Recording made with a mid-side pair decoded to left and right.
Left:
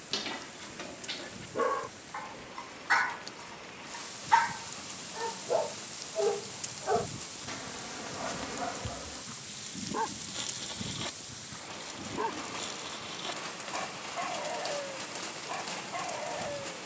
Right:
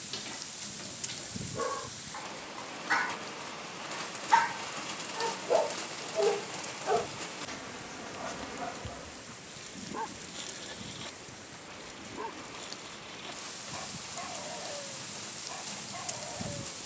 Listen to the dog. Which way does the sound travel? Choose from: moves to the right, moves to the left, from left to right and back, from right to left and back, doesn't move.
from left to right and back.